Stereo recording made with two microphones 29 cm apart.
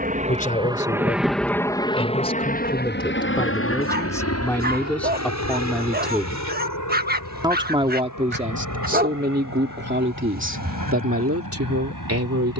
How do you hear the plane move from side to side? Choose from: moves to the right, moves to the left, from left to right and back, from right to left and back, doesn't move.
moves to the left.